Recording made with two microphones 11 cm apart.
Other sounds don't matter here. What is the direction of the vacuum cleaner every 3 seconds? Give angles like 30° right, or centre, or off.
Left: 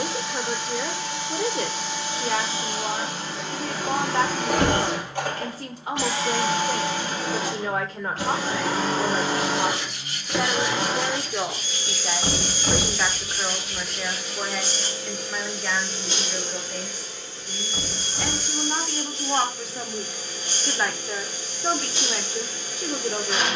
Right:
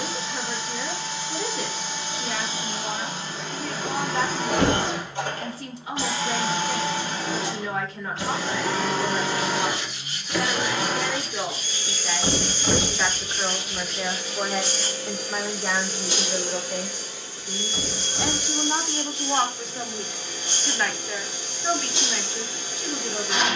60° left, 60° left, 50° left, 30° left, 10° left, 10° right, 20° right, 20° right.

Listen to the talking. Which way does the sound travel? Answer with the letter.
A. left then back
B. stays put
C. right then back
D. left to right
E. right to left
C.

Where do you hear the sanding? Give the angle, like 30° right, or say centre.
70° left.